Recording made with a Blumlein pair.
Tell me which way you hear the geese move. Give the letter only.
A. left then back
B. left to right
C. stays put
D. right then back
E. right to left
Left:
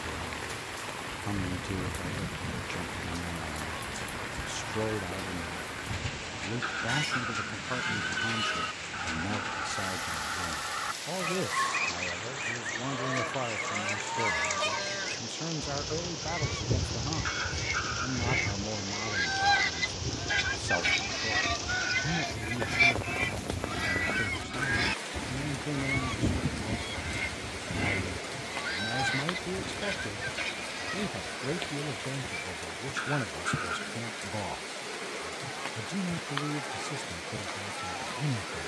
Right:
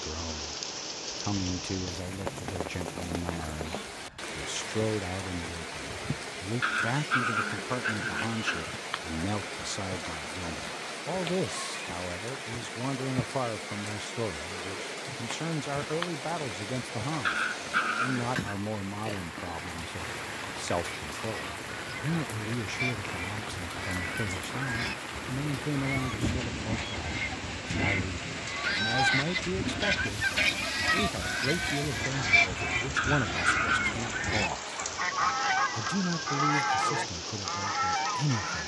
B.